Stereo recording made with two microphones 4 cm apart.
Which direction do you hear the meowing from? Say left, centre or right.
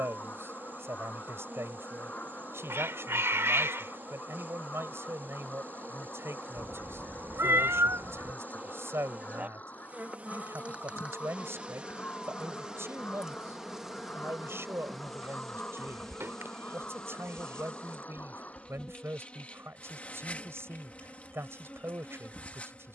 right.